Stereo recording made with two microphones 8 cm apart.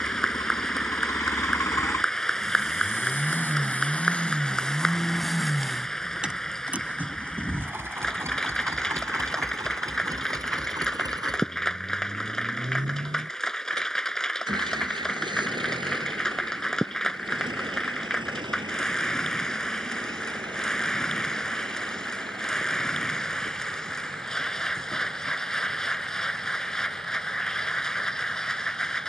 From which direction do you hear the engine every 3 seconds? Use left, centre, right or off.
left, centre, right, right, right, right, right, right, right, right.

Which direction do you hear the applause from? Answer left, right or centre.
centre.